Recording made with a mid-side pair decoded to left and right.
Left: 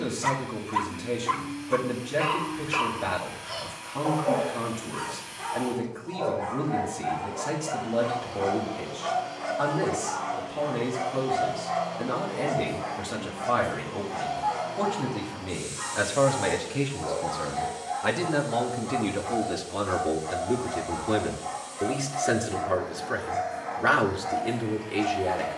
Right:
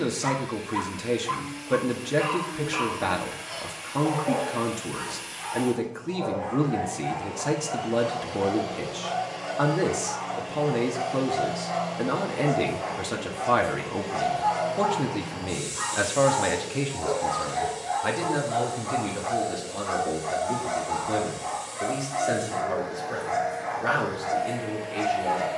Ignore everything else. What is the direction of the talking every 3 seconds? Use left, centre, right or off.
right, right, right, right, right, centre, left, left, left.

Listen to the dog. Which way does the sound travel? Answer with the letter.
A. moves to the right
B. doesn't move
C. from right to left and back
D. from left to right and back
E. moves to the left
A.